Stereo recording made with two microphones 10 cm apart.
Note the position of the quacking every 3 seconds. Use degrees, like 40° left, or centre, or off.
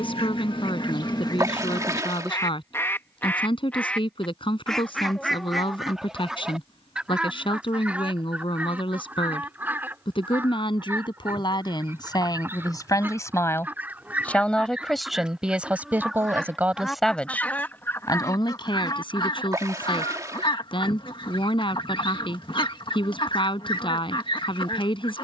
40° left, 10° left, 10° right, 20° right, 20° right, centre, 50° left, 50° left, 50° left.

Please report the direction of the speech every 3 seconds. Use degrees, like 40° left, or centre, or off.
60° left, 60° left, 60° left, 50° left, 30° left, 10° right, 50° left, 60° left, 60° left.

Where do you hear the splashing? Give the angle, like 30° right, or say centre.
30° right.